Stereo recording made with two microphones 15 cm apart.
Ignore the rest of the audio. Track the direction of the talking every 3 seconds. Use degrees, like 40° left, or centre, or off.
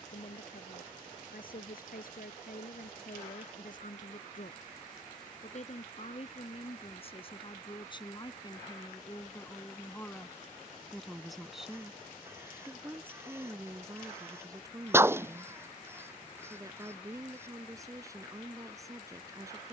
70° left, 60° left, 30° left, 10° left, 20° right, 20° right, 20° right.